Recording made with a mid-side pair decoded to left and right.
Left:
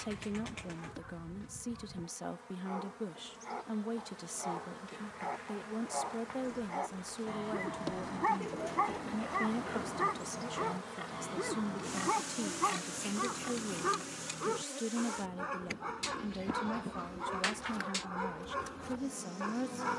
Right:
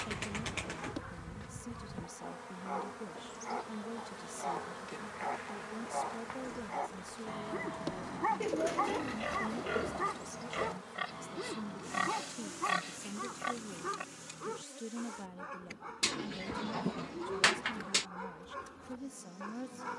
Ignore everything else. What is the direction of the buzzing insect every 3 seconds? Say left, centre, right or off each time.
right, right, centre, left, left, left, left.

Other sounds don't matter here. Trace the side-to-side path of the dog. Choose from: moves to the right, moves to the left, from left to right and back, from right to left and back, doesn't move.
moves to the left.